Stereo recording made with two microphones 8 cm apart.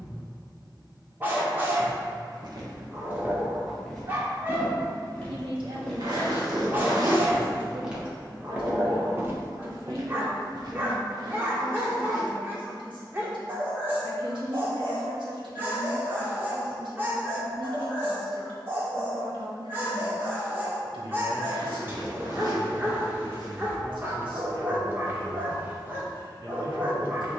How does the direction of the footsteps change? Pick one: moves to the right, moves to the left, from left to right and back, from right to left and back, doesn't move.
from right to left and back.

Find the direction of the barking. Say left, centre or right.
right.